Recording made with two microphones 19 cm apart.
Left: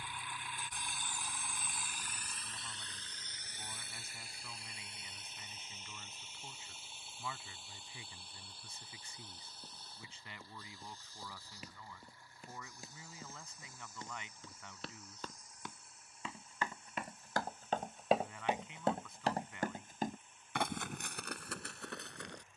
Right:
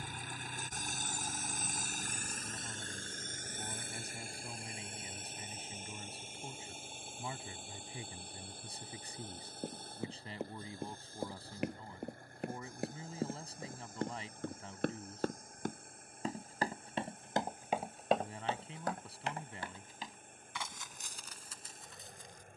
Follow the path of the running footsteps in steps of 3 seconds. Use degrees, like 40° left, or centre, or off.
off, off, off, 70° right, 60° right, 30° right, 40° left, 70° left.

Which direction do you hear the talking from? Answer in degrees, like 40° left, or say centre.
30° right.